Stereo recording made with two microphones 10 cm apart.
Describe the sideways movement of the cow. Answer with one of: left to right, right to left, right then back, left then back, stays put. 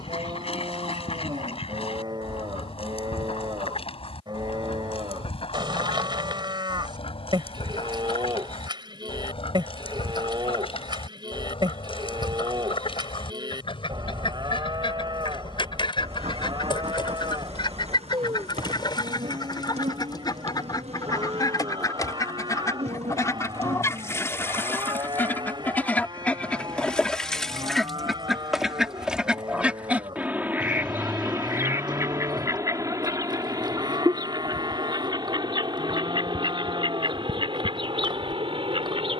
stays put.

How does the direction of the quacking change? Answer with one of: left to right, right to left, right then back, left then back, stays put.
left to right.